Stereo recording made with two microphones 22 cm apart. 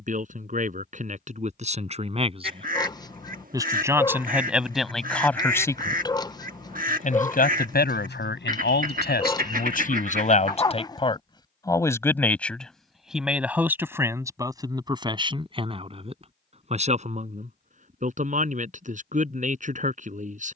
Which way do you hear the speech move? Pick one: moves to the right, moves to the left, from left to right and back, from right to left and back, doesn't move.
from right to left and back.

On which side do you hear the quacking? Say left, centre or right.
right.